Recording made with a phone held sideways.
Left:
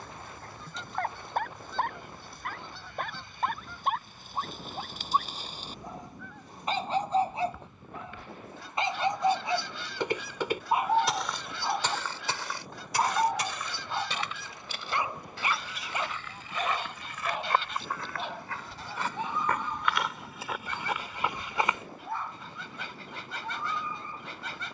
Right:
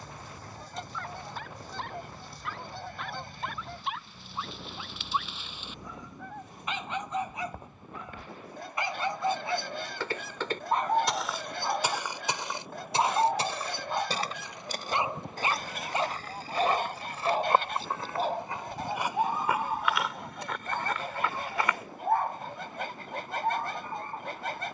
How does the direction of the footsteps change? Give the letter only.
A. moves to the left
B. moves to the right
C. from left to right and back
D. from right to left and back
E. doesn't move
C.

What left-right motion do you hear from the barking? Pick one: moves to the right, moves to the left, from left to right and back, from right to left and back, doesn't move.
moves to the right.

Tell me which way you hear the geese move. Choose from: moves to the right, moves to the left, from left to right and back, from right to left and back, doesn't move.
doesn't move.